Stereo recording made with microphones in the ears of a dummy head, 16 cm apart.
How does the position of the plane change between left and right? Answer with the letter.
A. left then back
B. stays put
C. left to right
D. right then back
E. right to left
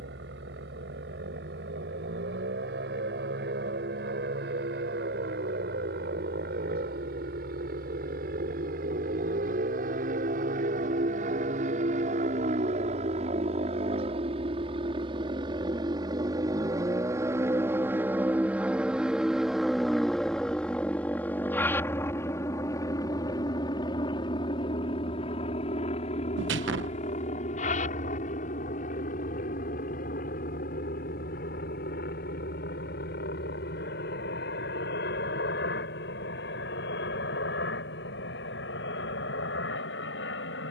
E.